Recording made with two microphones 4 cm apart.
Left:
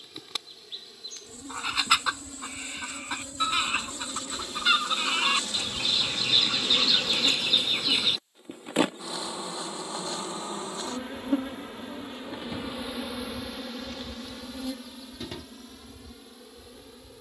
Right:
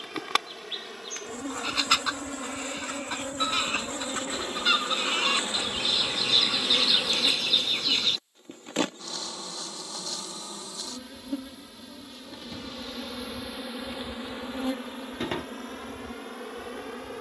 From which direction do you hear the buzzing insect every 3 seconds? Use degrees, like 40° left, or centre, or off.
60° right, 40° right, centre, 30° left, centre, 50° right.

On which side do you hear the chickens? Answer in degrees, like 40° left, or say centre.
10° left.